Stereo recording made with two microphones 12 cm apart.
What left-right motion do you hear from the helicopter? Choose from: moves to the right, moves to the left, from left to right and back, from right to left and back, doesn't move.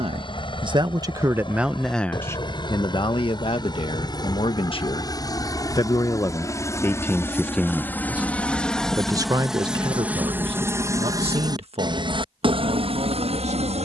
moves to the right.